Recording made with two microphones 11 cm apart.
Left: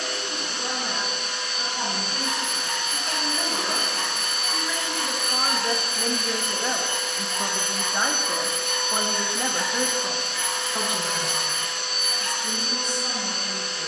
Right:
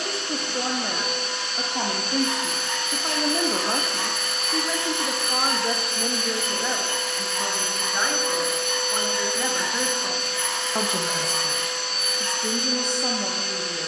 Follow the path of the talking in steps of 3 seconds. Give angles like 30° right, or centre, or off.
70° right, 40° right, 10° left, 10° right, 70° right.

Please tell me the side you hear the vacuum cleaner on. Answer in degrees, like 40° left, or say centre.
centre.